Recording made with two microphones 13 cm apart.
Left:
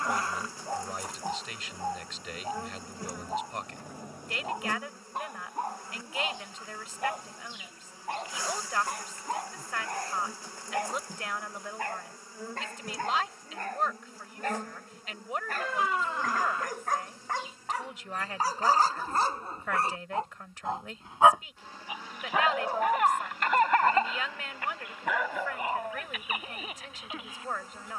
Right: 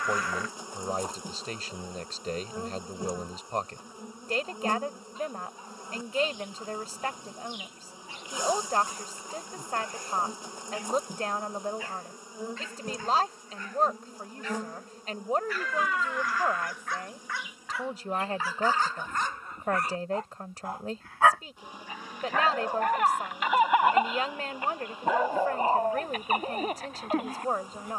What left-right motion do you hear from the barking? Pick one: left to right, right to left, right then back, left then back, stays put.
left to right.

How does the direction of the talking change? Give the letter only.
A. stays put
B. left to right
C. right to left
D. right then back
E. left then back
A.